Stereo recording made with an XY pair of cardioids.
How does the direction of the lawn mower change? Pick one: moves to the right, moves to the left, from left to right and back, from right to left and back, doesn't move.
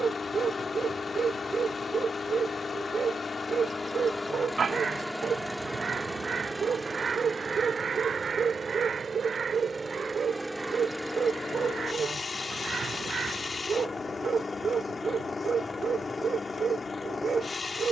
from left to right and back.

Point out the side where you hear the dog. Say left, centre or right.
right.